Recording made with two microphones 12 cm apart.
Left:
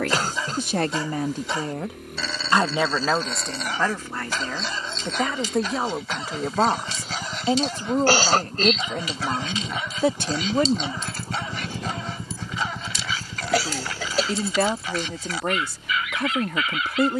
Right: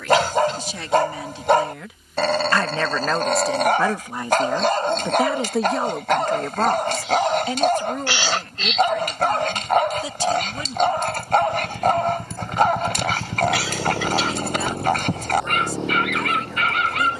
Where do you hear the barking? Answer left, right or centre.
right.